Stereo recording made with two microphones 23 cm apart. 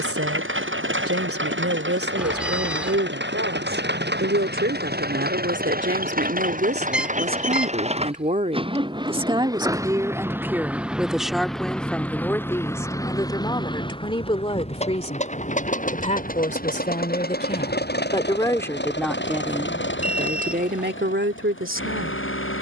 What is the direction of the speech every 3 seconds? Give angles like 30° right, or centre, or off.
70° right, 60° right, 40° right, 10° right, 20° left, 30° left, 10° right, 60° right.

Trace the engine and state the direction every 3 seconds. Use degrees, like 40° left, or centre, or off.
60° right, 50° right, 30° right, 10° right, 20° left, 40° left, 50° left, 60° left.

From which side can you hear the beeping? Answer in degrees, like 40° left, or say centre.
centre.